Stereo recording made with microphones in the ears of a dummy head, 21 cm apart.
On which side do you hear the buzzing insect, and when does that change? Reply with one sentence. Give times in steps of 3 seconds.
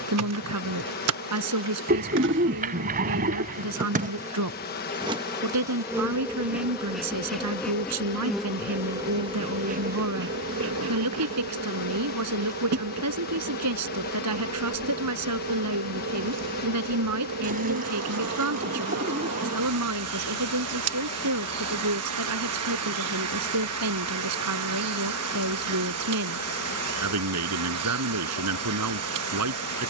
You can hear the buzzing insect on the right from 0 s, in the centre from 6 s and on the right from 9 s.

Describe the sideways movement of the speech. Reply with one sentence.
You can hear the speech stay in one place.